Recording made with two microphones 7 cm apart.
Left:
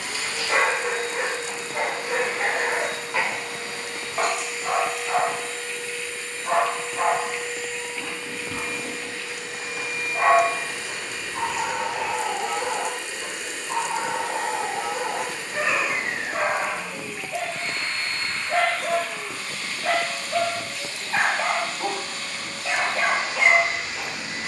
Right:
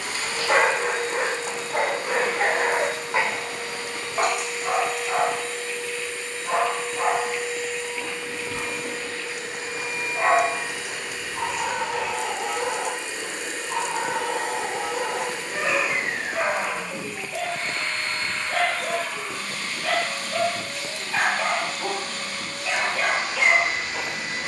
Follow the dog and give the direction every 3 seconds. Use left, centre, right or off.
right, centre, left, left, left, left, left, left.